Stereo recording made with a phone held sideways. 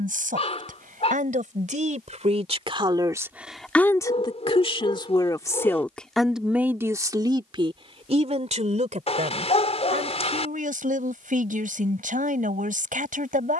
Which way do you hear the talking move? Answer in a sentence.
You can hear the talking go left and come back.